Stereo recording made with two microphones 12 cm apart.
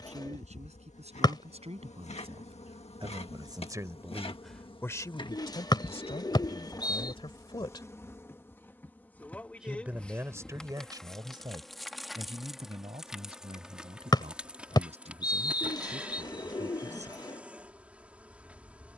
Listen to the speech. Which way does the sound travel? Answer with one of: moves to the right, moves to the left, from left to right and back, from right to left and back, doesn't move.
from right to left and back.